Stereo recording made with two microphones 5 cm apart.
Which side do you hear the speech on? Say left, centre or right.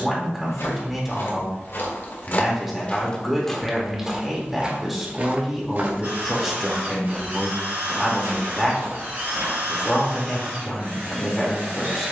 centre.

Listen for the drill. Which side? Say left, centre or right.
right.